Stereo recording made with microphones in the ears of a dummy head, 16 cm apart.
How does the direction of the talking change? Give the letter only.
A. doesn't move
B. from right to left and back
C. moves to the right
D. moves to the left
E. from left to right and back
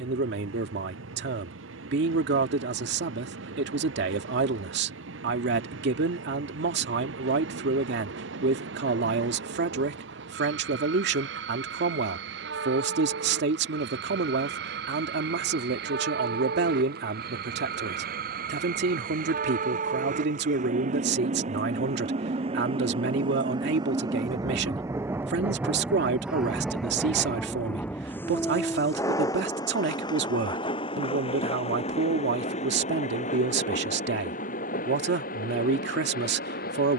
A.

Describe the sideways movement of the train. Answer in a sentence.
In this clip you hear the train move to the left.